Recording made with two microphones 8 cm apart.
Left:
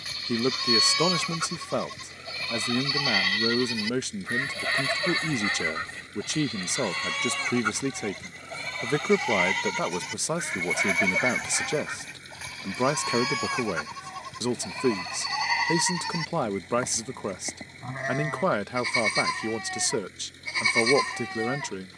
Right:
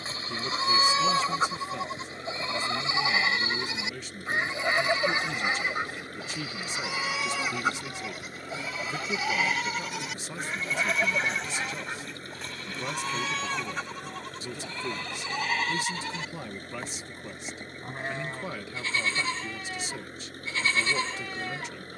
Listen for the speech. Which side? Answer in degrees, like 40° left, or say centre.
70° left.